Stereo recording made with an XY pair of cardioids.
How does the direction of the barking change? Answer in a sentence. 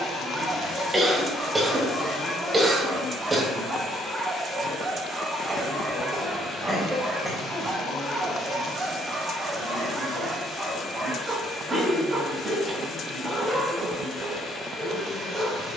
You can hear the barking stay in one place.